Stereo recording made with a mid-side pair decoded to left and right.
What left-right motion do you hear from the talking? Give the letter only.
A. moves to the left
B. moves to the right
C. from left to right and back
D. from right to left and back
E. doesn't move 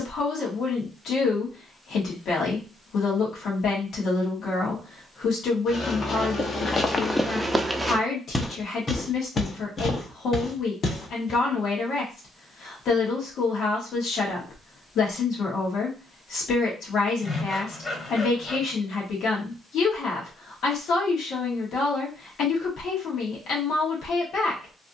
E.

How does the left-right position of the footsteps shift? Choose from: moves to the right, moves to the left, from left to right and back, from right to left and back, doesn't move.
from left to right and back.